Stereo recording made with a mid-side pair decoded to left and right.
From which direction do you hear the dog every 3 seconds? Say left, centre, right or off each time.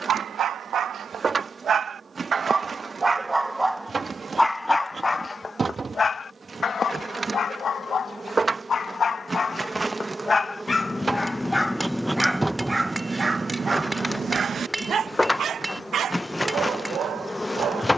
right, centre, left, left, right, right.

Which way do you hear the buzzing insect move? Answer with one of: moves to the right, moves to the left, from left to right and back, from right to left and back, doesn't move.
moves to the left.